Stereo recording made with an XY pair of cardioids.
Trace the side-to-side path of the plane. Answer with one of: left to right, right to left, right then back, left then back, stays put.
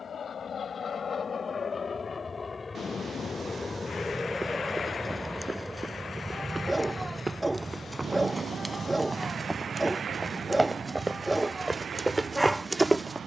left to right.